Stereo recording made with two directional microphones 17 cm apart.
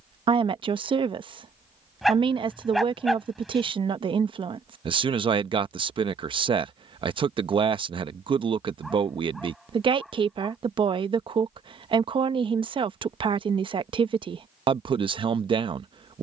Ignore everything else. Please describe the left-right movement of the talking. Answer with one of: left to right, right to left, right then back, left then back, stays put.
stays put.